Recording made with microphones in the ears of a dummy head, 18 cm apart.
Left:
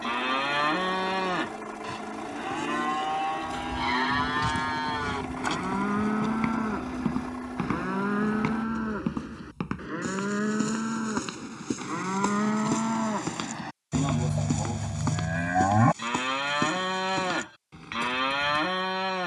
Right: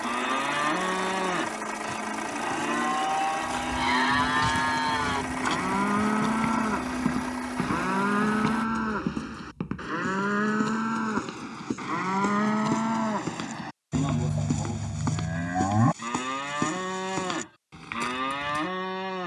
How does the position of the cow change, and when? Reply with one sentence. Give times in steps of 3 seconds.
In this clip you hear the cow in the centre from 0 s, on the right from 6 s, in the centre from 12 s and on the left from 15 s.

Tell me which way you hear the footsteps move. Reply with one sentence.
You can hear the footsteps go left and come back.